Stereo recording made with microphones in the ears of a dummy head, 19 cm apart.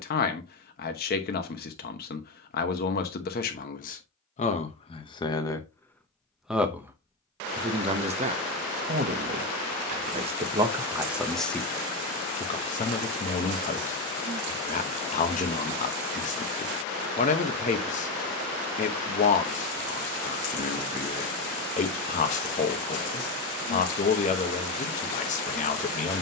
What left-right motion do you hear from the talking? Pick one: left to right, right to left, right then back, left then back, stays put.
right then back.